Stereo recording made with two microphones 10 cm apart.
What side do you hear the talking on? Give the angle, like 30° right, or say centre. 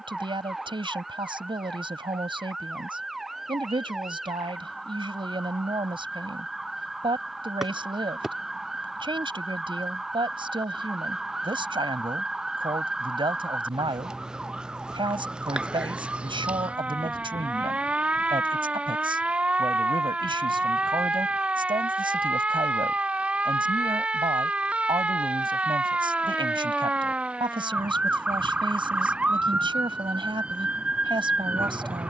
60° right.